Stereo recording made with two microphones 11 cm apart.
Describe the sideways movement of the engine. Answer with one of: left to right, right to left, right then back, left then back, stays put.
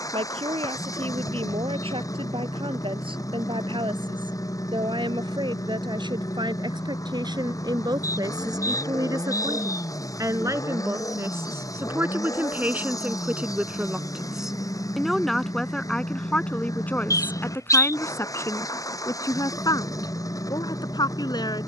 stays put.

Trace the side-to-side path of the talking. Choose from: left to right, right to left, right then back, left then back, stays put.
right to left.